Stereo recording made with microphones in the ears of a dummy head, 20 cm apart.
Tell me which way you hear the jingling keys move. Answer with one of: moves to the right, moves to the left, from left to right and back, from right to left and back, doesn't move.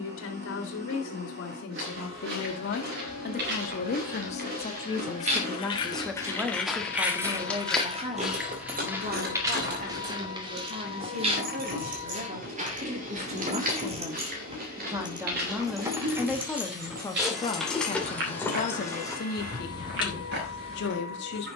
from left to right and back.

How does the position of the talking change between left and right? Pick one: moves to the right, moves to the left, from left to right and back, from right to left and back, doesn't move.
from left to right and back.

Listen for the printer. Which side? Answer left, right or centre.
right.